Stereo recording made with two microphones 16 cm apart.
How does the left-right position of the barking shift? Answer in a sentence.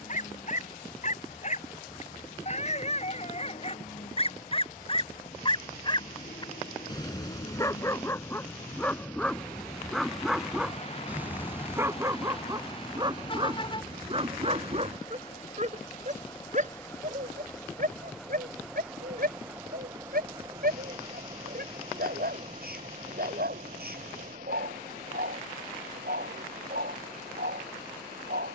You can hear the barking travel towards the right.